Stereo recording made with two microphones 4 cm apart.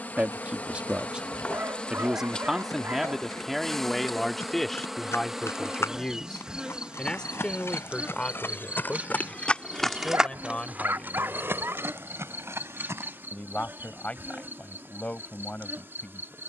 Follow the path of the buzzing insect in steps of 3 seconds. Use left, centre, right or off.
left, centre, right, right, right, right.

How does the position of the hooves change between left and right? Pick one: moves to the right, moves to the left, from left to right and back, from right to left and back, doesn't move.
moves to the right.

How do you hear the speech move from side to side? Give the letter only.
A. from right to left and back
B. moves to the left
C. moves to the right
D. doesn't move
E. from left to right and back
B.